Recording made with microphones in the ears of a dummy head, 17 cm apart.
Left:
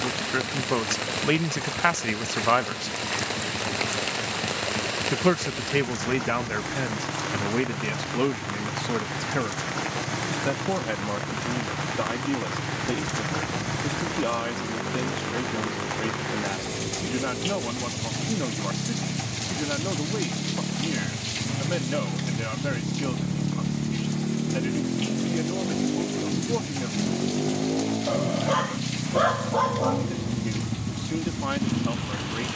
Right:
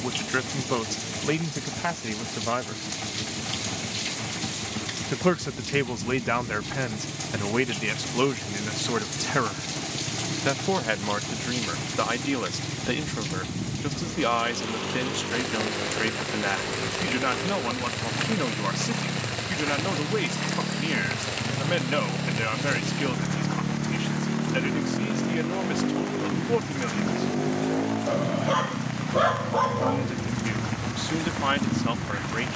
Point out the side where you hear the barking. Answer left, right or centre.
centre.